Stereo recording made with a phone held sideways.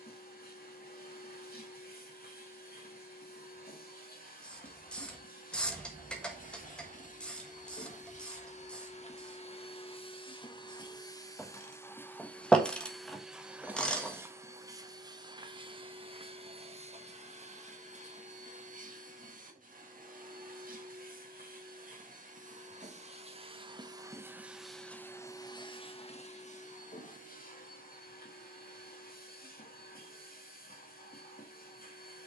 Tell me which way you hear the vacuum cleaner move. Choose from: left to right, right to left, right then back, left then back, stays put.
right then back.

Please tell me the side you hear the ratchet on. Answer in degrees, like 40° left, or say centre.
10° left.